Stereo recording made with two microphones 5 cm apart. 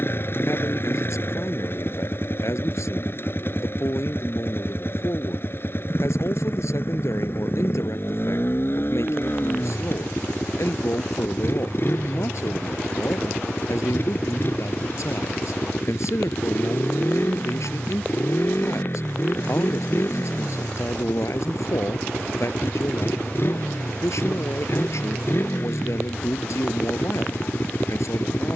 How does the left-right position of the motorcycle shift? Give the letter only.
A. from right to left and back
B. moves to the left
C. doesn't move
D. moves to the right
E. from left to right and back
C.